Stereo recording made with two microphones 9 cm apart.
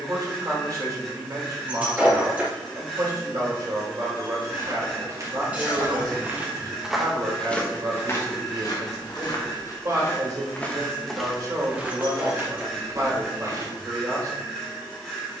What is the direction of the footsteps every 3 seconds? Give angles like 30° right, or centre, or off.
off, 40° right, 10° left, 20° left, 30° right.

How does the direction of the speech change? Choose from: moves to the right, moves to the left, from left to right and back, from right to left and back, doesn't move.
doesn't move.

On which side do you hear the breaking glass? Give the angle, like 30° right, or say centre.
10° right.